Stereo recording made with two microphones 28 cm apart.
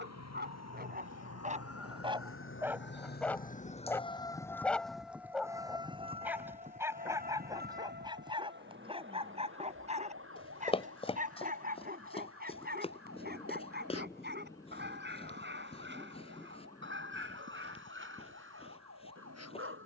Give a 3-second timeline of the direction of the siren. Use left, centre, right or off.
left, centre, right, right, right, right, right.